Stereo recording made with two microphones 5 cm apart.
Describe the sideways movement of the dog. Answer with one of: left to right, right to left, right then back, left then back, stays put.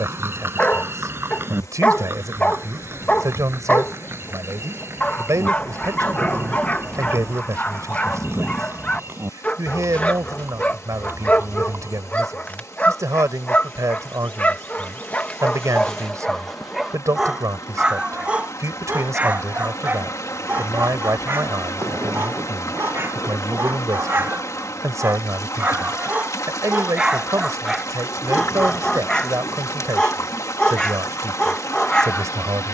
right then back.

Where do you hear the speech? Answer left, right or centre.
right.